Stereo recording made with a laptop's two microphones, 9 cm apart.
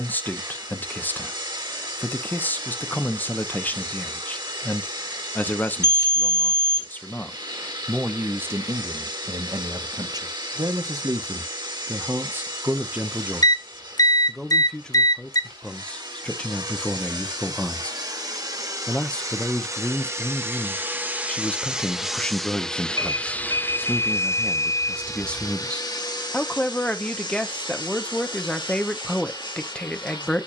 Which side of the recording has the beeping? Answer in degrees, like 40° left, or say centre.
50° left.